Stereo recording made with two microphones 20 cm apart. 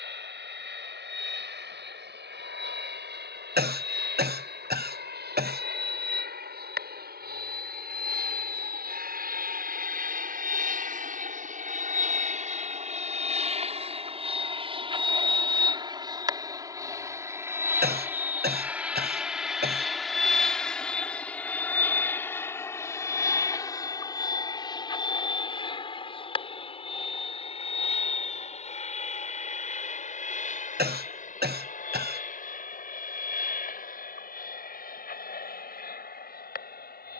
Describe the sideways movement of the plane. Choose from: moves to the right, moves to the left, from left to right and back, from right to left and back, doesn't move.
moves to the left.